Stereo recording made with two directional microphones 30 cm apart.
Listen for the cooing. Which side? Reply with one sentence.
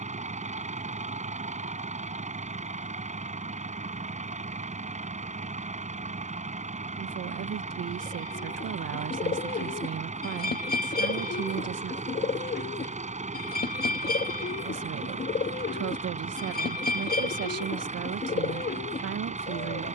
In this clip you hear the cooing on the left.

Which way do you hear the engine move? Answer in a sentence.
In this clip you hear the engine stay put.